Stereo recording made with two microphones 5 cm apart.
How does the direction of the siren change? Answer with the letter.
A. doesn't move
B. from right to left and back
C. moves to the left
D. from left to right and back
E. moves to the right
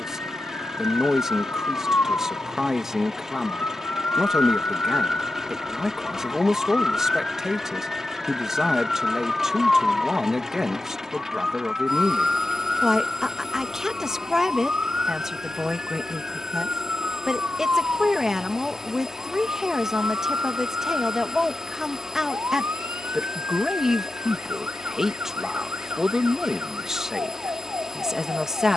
E.